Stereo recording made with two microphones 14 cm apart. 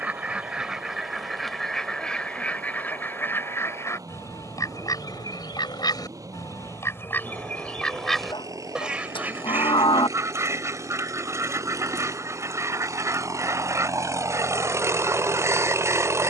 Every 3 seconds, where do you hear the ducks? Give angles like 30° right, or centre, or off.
centre, 20° left, 10° left, 20° right, 20° right, 20° right.